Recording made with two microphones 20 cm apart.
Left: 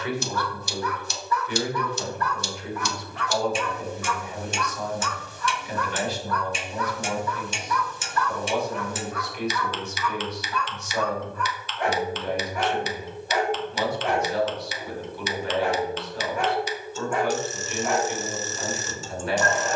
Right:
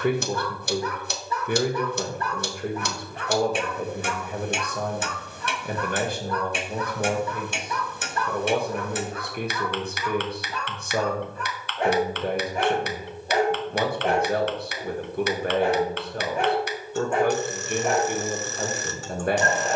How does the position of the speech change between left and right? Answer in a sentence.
You can hear the speech stay in one place.